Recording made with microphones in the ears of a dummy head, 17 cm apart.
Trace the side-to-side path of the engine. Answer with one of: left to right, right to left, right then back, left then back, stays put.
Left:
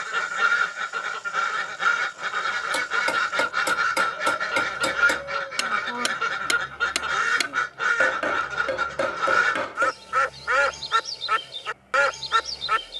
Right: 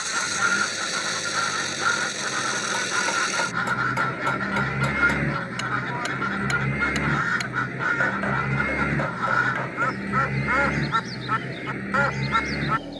stays put.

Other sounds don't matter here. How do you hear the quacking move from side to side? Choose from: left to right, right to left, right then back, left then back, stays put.
stays put.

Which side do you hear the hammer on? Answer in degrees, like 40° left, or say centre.
50° left.